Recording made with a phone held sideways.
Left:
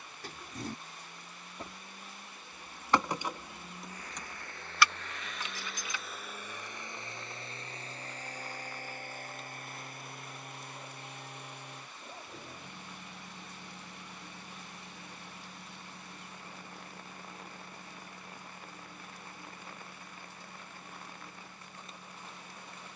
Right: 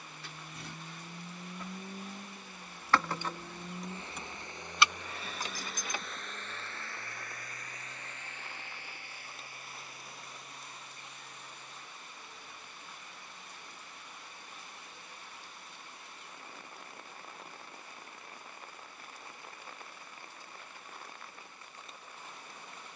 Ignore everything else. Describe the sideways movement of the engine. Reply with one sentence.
You can hear the engine move to the left.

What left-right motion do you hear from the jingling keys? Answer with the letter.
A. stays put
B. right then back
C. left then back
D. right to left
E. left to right
E.